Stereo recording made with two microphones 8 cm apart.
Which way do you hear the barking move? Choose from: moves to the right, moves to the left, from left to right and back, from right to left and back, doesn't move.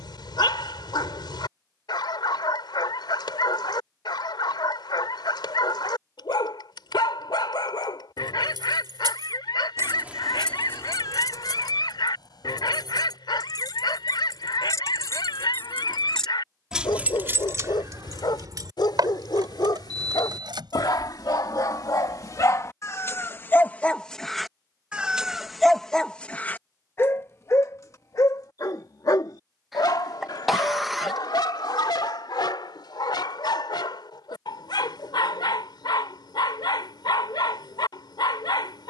from left to right and back.